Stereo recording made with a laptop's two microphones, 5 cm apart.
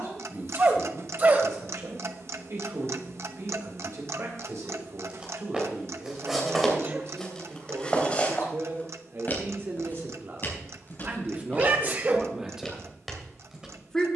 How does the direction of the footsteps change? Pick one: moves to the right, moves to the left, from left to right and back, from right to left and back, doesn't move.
from right to left and back.